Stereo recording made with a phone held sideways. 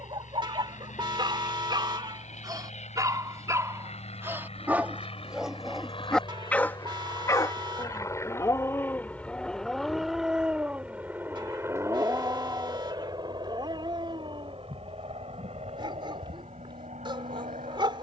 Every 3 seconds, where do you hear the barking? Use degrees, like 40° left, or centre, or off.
30° right, 10° right, 20° left, 10° right, 30° right, 30° right.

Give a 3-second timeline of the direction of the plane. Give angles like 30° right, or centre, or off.
60° left, 50° left, 30° left, centre, 30° right, 50° right.